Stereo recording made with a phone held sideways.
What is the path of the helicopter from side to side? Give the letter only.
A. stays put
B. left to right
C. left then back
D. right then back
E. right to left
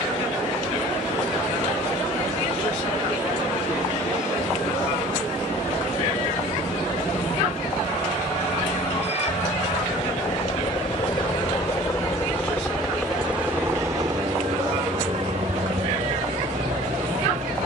B.